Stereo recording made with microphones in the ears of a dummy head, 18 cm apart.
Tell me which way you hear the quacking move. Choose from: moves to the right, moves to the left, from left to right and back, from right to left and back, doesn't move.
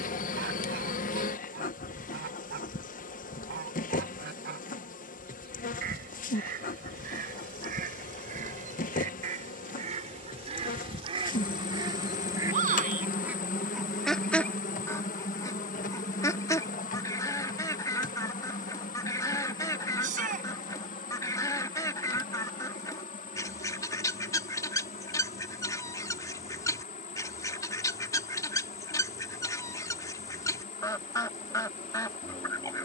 moves to the left.